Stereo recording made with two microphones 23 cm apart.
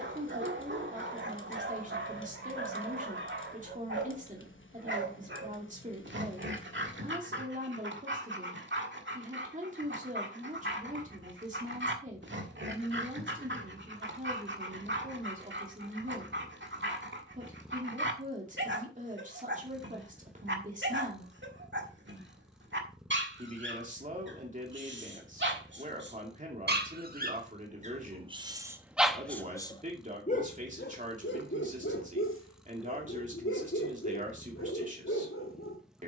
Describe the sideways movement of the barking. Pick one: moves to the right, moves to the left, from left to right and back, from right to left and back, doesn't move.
moves to the left.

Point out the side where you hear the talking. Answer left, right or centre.
right.